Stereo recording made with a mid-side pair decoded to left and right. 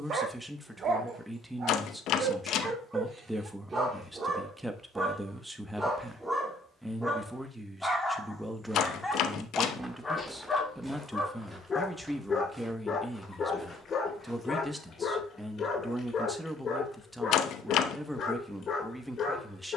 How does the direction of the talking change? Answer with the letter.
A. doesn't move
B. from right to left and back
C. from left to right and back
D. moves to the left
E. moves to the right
A.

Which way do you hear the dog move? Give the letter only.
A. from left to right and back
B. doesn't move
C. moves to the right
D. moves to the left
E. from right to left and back
D.